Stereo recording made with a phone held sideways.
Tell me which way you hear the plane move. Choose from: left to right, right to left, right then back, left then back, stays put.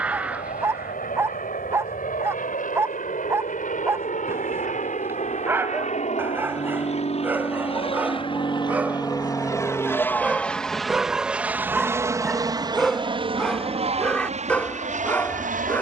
left to right.